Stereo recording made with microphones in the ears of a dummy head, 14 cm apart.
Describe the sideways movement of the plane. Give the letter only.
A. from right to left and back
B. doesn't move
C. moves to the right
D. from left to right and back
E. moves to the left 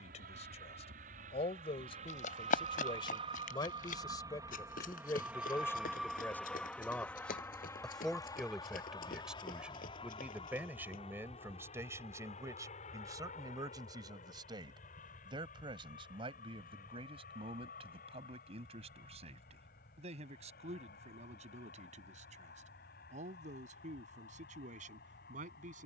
E.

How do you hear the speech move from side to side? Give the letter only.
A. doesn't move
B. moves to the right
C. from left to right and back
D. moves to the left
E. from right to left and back
B.